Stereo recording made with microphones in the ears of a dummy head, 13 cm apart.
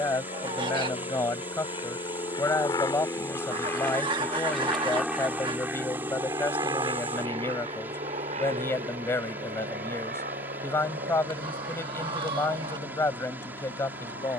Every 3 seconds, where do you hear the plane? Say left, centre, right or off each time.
left, centre, right, right, right.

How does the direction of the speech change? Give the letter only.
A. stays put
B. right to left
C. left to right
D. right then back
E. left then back
A.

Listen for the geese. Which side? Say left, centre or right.
right.